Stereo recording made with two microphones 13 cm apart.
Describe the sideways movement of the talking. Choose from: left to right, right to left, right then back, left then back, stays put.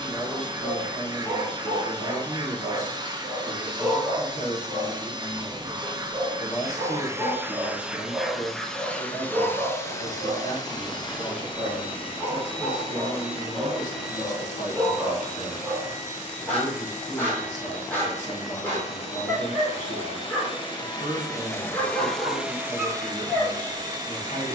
stays put.